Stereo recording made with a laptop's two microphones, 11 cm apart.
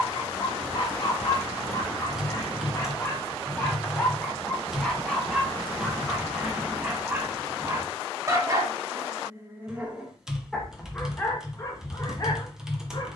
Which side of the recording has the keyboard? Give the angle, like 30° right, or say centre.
10° right.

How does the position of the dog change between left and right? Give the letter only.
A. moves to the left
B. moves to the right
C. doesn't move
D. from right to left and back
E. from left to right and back
E.